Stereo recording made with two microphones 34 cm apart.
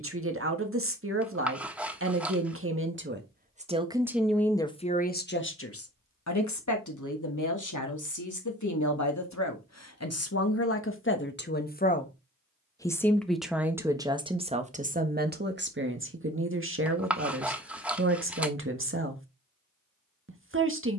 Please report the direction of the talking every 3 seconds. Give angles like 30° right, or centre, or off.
40° right, 10° left, 60° left, 40° left, 10° right, 30° right, 40° right.